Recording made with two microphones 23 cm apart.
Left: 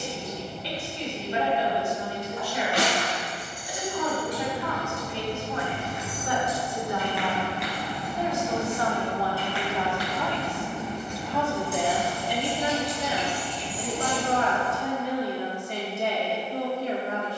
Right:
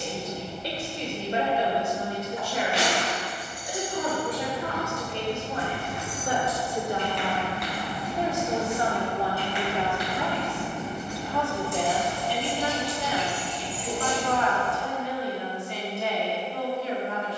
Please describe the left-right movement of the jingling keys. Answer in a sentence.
In this clip you hear the jingling keys go right and come back.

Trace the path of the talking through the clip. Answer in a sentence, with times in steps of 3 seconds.
In this clip you hear the talking on the right from 0 s, in the centre from 9 s and on the left from 12 s.